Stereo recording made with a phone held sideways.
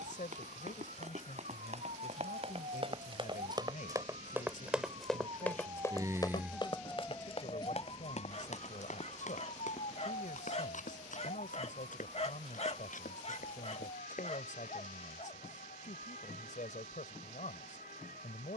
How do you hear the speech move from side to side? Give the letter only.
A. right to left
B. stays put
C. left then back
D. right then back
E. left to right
B.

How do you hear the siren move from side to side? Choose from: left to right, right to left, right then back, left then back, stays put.
right to left.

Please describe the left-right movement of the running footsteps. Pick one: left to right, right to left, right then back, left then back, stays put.
right to left.